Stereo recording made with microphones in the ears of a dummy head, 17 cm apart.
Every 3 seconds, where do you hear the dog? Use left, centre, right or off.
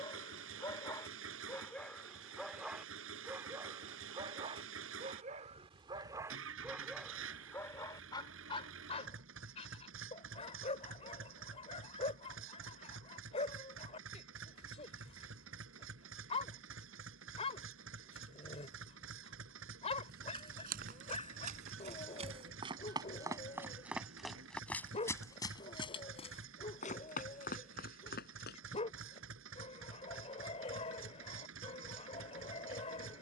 centre, right, centre, left, left, left, left, left, left, left, left.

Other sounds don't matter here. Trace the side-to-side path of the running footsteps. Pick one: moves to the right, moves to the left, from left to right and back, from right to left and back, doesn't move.
moves to the left.